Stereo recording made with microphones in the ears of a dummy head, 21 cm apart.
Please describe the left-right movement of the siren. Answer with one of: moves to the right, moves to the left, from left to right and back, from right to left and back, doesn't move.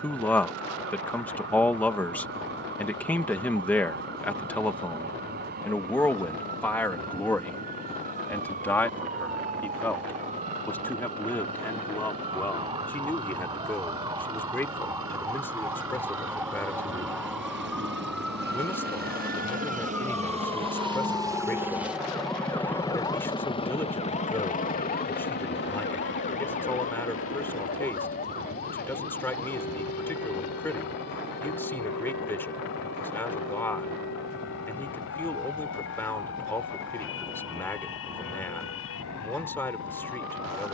moves to the left.